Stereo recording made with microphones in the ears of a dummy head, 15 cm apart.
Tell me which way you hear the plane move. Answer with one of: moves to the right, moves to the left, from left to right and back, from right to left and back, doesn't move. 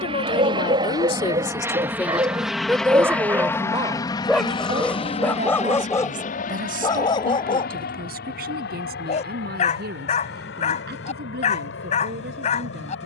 moves to the left.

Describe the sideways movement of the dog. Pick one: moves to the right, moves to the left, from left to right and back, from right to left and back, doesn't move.
moves to the left.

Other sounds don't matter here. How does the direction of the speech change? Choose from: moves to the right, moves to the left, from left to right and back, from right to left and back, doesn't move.
moves to the right.